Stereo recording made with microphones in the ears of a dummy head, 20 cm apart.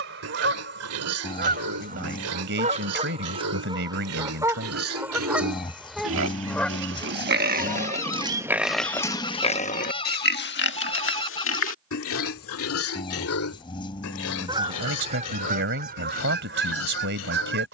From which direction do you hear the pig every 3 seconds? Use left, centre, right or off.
right, right, right, left, left, left.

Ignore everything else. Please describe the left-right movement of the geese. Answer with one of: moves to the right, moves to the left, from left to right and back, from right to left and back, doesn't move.
from right to left and back.